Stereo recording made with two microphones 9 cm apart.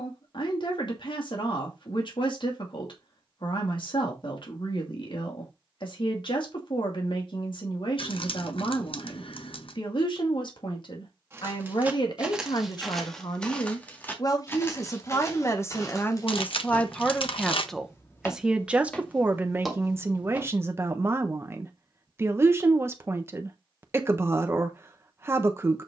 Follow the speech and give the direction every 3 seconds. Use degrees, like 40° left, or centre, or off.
70° left, 70° left, 70° left, 60° left, 50° left, 20° left, 20° right, 30° right, 30° right.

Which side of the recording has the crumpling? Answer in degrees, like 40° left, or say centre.
80° left.